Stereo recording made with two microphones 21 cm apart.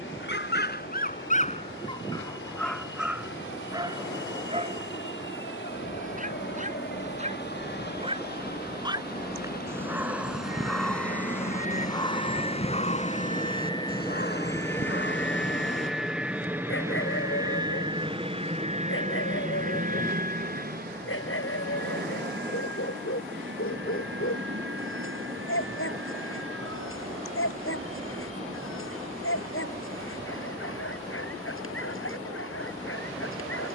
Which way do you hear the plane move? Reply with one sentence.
In this clip you hear the plane move from left to right.